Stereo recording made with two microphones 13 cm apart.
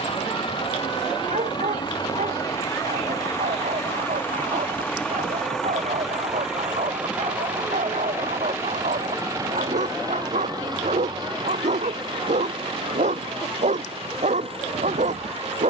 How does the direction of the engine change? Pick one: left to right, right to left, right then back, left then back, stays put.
left to right.